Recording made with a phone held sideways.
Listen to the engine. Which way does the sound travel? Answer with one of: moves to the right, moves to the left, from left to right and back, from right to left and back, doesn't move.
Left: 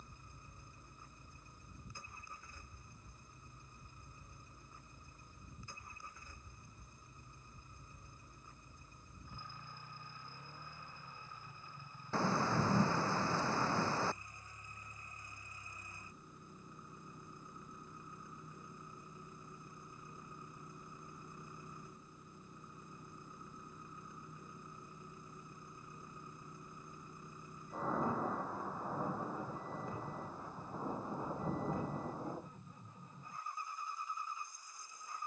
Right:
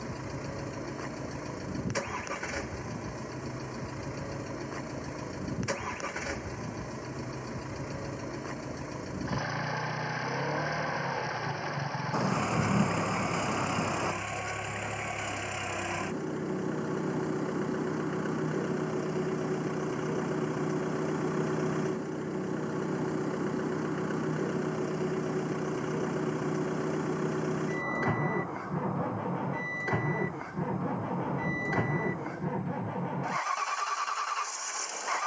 doesn't move.